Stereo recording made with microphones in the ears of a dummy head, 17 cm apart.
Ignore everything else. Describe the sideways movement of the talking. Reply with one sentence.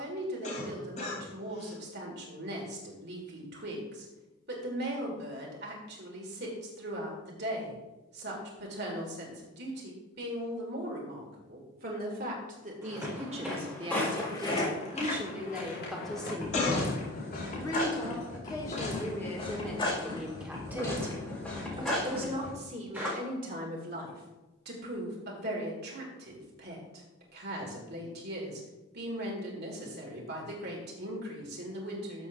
In this clip you hear the talking go left and come back.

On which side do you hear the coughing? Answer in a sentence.
In this clip you hear the coughing on the left.